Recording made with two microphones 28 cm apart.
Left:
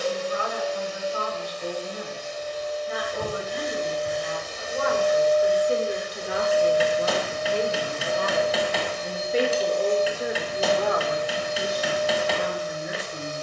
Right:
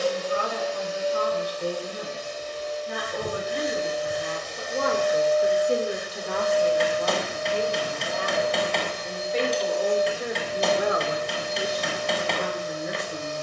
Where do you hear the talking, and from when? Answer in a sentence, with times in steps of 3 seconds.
You can hear the talking on the right from 0 s, on the left from 6 s, in the centre from 9 s and on the right from 12 s.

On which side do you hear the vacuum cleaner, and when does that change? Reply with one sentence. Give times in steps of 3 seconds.
You can hear the vacuum cleaner on the right from 0 s, in the centre from 3 s, on the left from 6 s and on the right from 9 s.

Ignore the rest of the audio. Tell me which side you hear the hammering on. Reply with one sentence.
You can hear the hammering in the centre.